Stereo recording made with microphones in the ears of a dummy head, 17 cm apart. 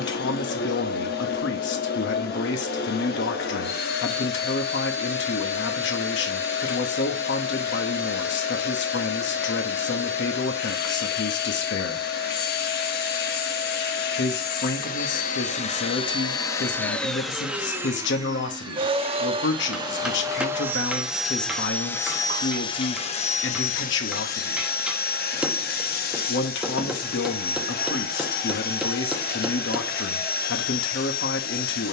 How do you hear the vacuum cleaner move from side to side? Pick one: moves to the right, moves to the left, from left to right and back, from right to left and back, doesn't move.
from left to right and back.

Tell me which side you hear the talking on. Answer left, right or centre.
left.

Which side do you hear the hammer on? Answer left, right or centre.
centre.